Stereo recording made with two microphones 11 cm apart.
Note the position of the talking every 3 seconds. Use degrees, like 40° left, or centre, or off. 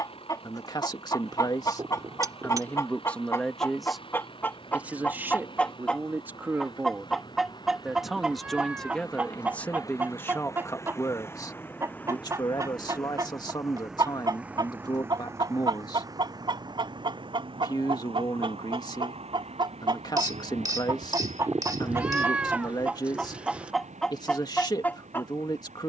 30° left, 10° right, 10° right, 20° left, 40° left, 40° left, 40° left, 40° left, 40° left.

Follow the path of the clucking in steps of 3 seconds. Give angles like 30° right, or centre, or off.
30° left, 20° left, centre, 20° right, 30° right, 40° right, 50° right, 20° right, 10° left.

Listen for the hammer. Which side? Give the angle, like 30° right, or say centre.
30° right.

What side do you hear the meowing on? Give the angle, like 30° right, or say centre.
10° right.